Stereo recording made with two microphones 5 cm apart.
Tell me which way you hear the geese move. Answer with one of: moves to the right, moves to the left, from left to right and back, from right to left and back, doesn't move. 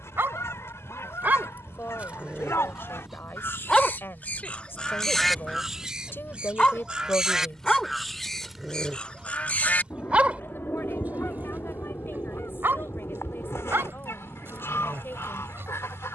from left to right and back.